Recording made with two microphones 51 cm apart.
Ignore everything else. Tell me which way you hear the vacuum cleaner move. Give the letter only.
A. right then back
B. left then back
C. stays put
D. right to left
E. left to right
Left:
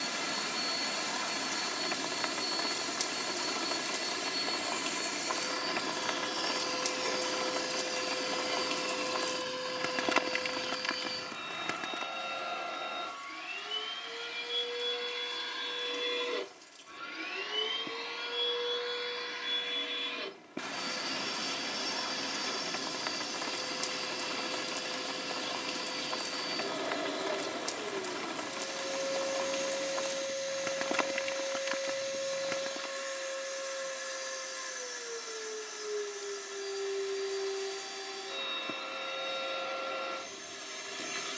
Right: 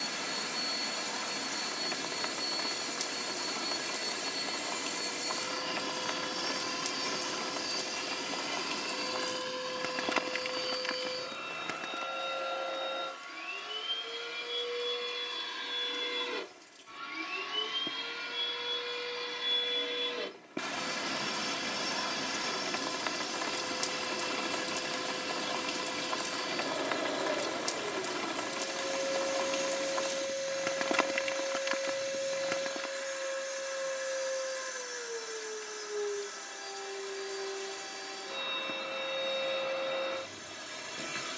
B.